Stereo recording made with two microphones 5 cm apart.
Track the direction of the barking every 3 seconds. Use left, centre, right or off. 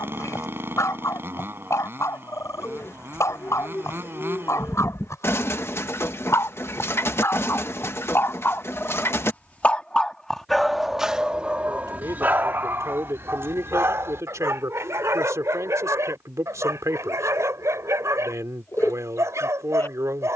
left, left, left, centre, right, right, right.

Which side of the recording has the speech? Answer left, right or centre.
right.